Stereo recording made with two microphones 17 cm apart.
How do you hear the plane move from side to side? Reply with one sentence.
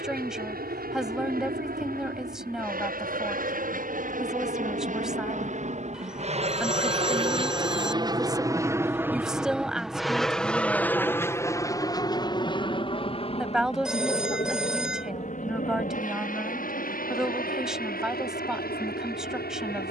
In this clip you hear the plane move from right to left.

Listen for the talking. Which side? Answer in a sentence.
In this clip you hear the talking in the centre.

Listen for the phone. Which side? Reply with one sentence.
You can hear the phone in the centre.